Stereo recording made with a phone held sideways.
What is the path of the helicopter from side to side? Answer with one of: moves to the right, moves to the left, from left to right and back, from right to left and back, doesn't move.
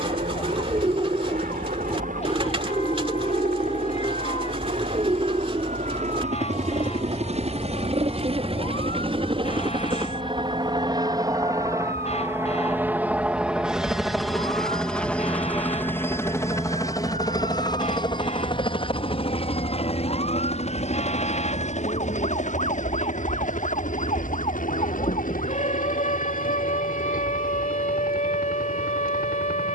moves to the left.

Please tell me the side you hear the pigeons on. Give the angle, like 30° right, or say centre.
30° right.